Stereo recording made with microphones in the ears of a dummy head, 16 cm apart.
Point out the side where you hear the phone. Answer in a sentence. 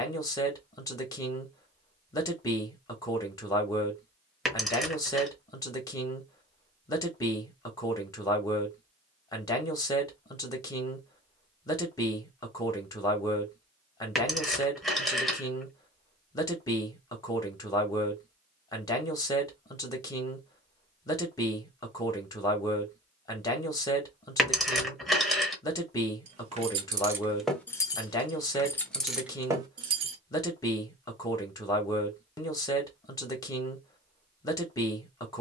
In this clip you hear the phone in the centre.